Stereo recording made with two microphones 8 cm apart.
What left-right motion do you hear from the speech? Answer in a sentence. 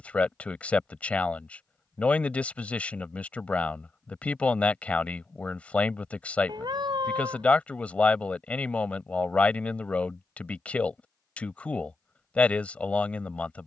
You can hear the speech stay in one place.